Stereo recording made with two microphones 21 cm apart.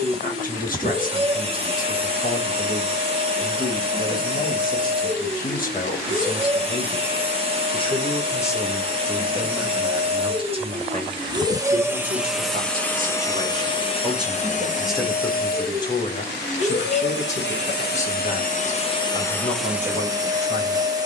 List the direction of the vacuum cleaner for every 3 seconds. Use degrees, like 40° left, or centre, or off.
30° right, 30° right, 30° right, 20° right, 20° left, 50° left, 10° left.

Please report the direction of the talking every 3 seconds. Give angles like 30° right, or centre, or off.
40° left, 40° left, 30° left, 20° right, 30° right, 30° left, 40° left.